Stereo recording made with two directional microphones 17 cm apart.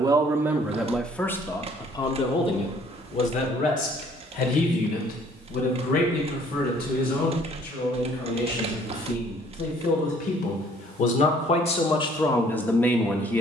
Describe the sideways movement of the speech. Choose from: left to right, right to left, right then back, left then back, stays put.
left then back.